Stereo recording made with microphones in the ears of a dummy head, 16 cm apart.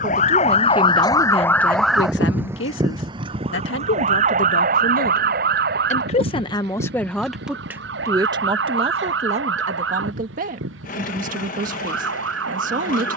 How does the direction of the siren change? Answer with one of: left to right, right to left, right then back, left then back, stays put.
left to right.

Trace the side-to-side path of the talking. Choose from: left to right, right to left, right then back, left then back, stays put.
left then back.